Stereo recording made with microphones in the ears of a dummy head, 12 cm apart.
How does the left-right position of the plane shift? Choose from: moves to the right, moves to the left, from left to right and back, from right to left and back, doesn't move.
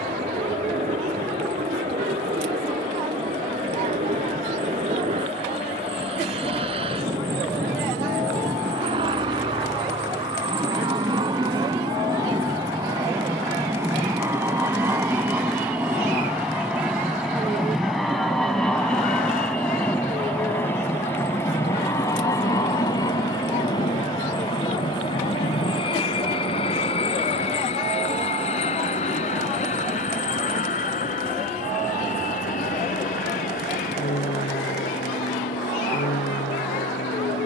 moves to the left.